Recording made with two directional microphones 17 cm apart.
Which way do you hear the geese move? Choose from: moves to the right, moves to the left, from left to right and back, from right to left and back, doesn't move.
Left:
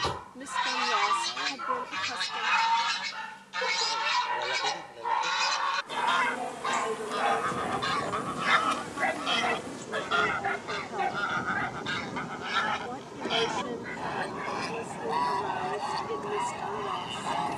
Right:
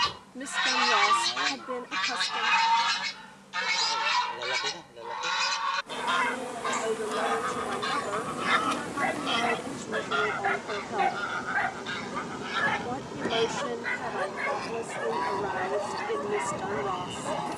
moves to the left.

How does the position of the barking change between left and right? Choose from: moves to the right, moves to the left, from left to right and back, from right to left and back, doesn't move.
moves to the right.